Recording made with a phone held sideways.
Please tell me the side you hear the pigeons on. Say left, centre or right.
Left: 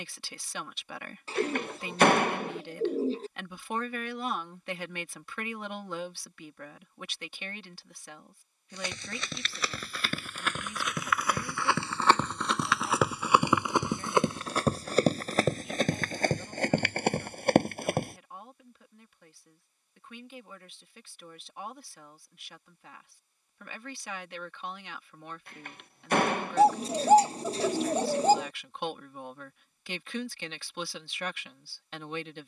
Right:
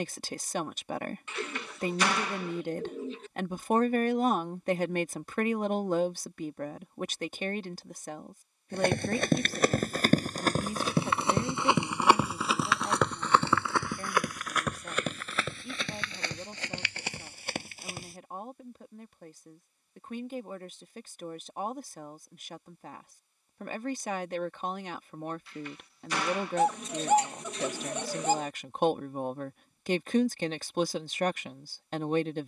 left.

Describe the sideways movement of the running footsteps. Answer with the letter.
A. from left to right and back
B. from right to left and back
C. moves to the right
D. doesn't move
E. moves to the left
E.